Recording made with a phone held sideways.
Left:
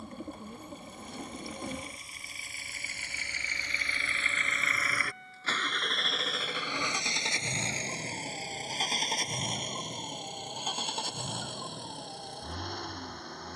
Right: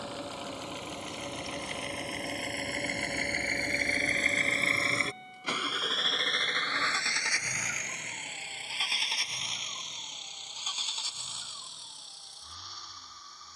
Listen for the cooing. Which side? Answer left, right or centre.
left.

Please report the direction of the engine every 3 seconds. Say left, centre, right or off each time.
right, right, left, left, left.